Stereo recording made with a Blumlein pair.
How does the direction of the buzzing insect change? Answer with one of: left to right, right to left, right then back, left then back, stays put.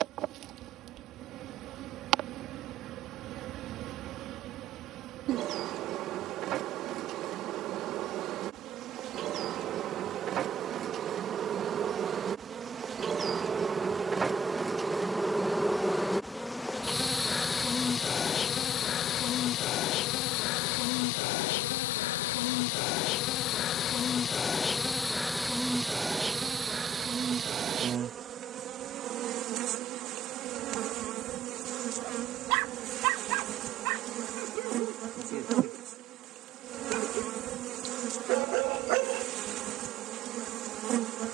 left then back.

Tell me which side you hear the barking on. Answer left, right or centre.
right.